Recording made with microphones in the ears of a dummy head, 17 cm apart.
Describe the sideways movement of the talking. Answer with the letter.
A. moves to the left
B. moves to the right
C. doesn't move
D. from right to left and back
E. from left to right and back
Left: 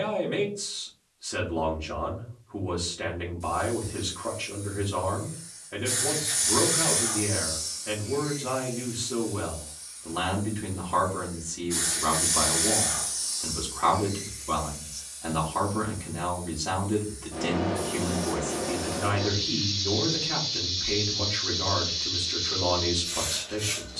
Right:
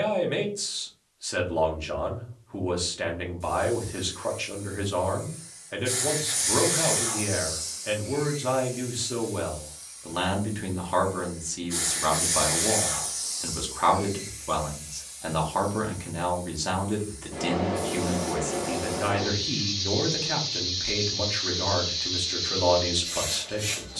C.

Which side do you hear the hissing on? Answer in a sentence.
In this clip you hear the hissing in the centre.